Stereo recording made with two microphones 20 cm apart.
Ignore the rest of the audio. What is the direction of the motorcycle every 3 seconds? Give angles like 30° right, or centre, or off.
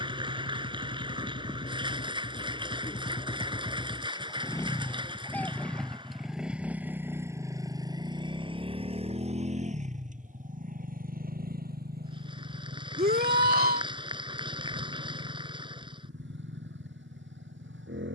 40° left, 20° left, 10° right, 40° right, 60° right, 60° right.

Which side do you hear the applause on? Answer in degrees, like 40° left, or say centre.
20° right.